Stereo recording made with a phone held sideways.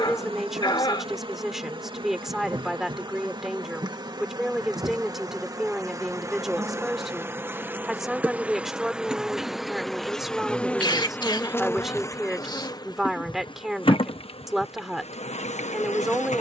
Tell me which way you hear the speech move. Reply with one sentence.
You can hear the speech stay put.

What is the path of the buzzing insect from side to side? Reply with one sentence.
You can hear the buzzing insect travel towards the left.